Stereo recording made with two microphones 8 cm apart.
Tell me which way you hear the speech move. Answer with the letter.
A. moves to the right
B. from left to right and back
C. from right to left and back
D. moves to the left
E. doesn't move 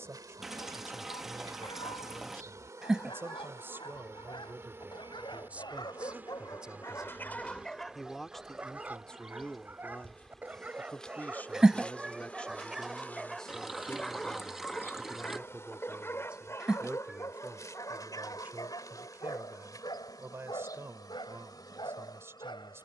C.